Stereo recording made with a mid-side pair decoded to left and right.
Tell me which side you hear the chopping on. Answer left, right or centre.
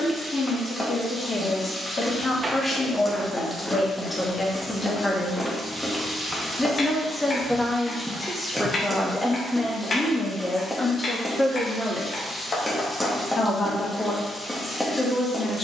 left.